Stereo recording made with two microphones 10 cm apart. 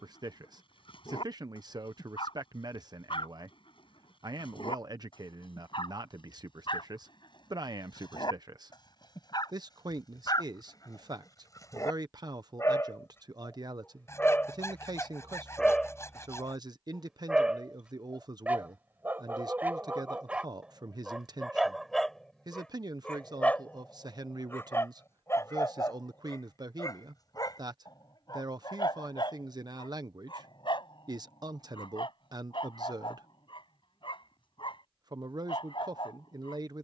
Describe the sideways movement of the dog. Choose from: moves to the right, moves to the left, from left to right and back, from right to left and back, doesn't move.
from left to right and back.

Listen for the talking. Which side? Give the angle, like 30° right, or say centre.
40° right.